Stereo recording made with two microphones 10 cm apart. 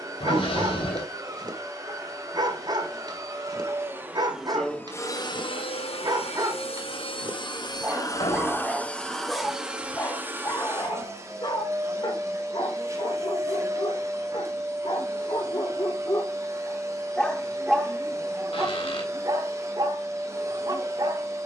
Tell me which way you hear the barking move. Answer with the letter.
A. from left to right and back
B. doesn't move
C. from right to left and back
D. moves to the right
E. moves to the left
C.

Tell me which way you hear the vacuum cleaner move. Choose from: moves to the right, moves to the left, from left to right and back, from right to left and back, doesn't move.
from right to left and back.